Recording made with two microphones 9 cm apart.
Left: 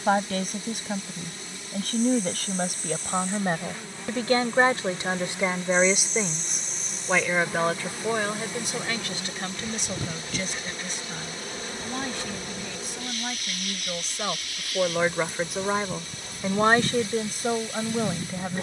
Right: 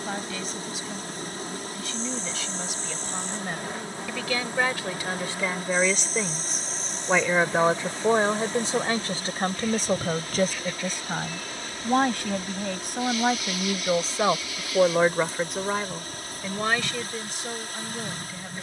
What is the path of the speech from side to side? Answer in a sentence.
You can hear the speech go right and come back.